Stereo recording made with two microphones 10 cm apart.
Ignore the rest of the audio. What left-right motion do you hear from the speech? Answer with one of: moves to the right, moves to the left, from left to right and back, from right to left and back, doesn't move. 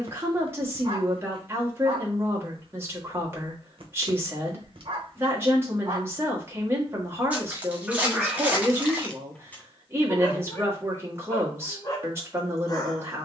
doesn't move.